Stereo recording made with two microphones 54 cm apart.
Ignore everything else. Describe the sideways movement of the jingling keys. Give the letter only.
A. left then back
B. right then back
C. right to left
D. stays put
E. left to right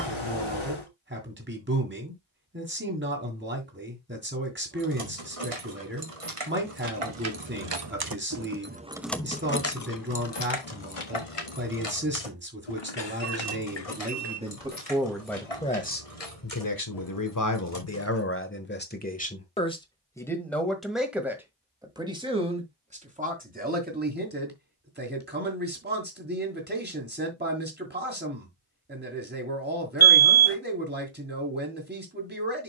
C.